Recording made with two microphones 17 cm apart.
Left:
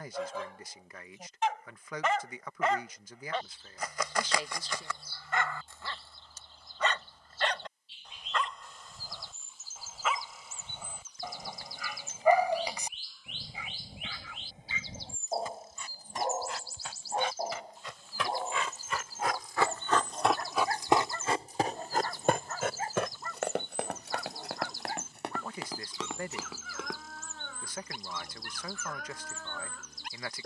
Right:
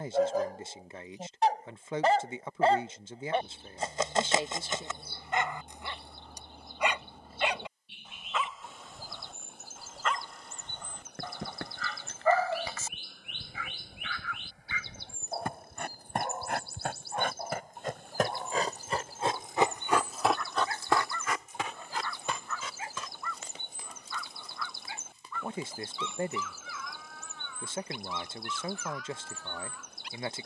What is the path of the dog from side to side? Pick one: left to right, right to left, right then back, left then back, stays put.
right to left.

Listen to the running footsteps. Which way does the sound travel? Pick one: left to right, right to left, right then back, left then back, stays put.
right to left.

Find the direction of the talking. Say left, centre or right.
right.